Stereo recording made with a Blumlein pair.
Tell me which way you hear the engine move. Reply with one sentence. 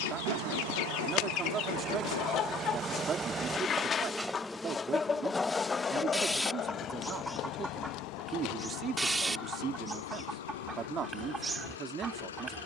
In this clip you hear the engine travel towards the left.